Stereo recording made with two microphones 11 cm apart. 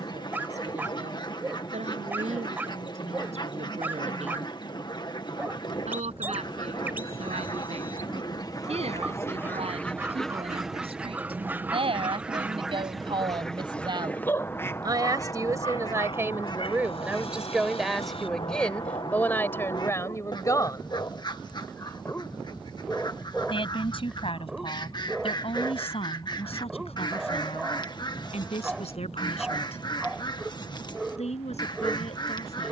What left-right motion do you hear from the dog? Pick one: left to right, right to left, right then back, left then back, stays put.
left then back.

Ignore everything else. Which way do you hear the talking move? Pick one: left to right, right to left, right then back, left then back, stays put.
right to left.